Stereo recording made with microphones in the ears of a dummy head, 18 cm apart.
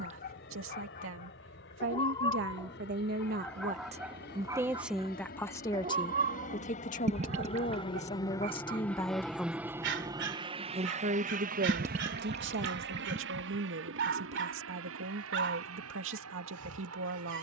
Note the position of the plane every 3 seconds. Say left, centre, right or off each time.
left, left, left, right, right, right.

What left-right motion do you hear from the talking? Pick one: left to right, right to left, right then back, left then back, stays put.
left then back.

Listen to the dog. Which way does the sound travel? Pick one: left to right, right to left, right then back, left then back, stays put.
left to right.